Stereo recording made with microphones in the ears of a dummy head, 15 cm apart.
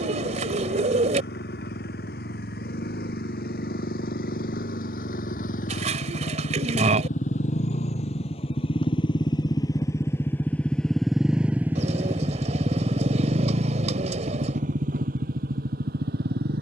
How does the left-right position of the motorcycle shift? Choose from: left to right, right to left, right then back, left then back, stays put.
left to right.